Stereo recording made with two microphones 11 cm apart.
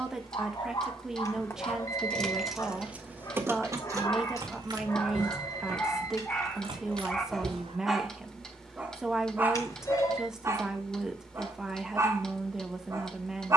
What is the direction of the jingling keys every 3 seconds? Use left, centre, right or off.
centre, right, right, off, off.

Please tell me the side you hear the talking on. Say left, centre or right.
centre.